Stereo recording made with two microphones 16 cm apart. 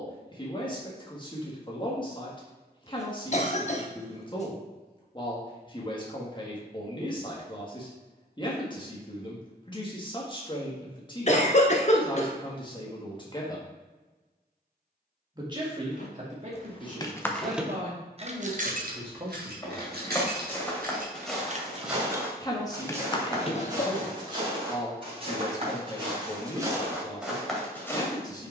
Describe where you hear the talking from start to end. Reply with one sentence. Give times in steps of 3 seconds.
You can hear the talking on the left from 0 s, on the right from 15 s and on the left from 21 s.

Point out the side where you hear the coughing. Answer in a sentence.
You can hear the coughing on the left.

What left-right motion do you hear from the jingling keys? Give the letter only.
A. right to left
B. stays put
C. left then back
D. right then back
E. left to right
D.